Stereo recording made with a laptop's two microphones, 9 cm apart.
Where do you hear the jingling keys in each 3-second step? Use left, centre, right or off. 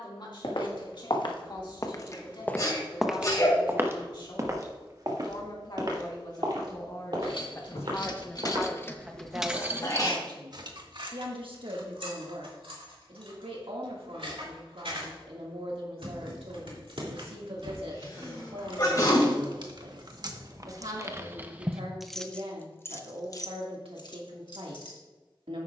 off, off, left, right, right, right, right, centre, left.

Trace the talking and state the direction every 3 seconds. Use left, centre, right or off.
left, left, left, right, right, right, right, right, right.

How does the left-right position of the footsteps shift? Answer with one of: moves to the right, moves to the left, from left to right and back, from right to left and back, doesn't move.
moves to the right.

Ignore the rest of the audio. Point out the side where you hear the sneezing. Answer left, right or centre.
left.